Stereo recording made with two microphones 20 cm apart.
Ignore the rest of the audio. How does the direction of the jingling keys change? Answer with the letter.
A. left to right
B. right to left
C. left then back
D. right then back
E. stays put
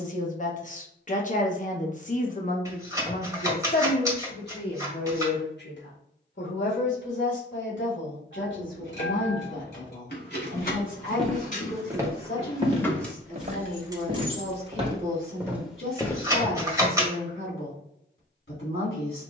A.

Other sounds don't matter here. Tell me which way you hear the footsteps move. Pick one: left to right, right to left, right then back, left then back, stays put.
right then back.